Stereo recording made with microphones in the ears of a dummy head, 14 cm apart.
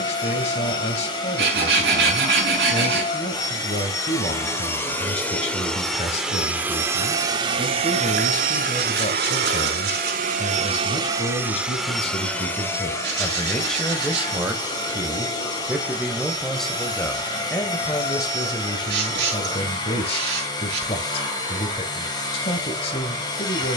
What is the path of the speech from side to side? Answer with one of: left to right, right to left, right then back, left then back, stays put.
right then back.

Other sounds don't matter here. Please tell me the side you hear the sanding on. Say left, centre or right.
right.